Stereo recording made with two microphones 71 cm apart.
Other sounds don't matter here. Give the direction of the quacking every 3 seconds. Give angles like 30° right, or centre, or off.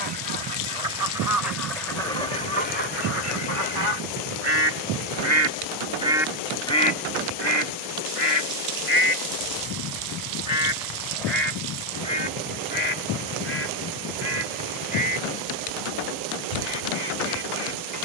60° right, 40° right, 20° left, 60° left, 70° left, 80° left.